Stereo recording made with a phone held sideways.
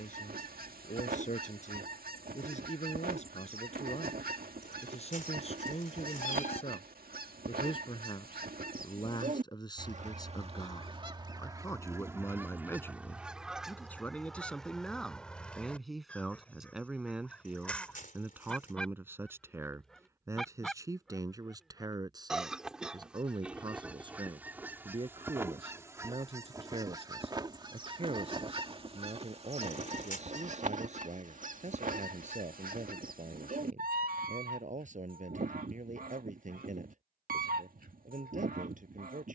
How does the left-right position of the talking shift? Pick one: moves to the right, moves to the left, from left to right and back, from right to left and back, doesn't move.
moves to the right.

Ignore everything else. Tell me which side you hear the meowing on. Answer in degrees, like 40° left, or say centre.
60° left.